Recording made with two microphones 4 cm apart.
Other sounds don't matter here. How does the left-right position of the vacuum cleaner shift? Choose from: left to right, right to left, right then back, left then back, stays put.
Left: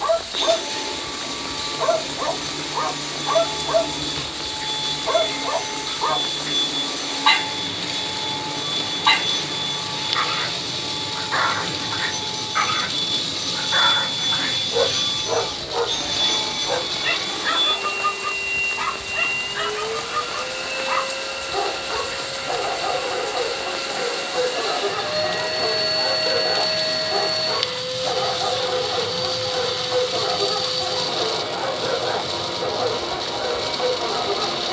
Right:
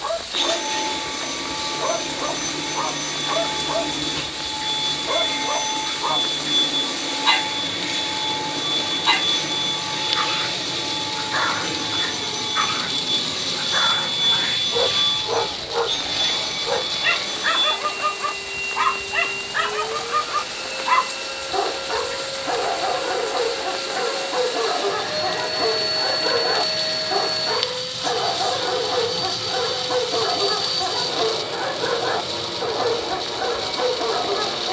right to left.